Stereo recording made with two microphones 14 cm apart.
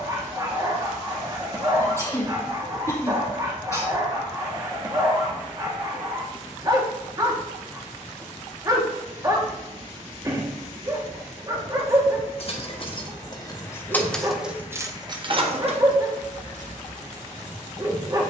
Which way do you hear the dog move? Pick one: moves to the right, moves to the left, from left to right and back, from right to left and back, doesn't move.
doesn't move.